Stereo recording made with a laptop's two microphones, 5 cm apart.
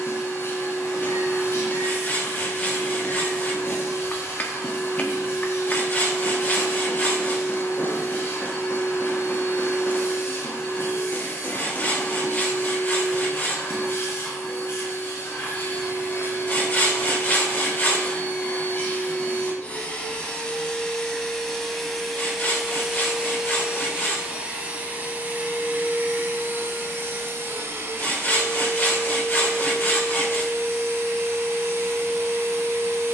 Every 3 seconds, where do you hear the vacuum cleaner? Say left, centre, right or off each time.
left, left, left, left, left, left, left, centre, right, right, right.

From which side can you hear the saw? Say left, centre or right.
left.